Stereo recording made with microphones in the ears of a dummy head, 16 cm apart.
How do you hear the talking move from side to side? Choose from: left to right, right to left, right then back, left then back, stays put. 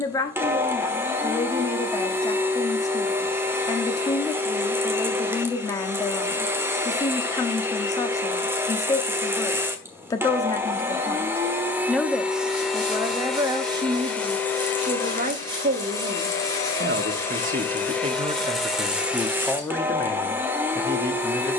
right then back.